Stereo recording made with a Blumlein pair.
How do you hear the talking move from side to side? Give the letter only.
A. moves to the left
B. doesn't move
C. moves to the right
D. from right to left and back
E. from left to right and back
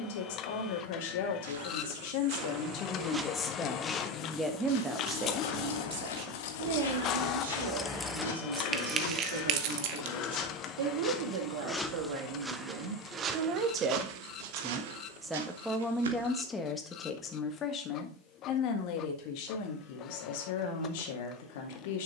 E.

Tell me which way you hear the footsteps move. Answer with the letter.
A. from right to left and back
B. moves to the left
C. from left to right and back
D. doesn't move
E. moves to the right
A.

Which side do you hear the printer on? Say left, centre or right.
left.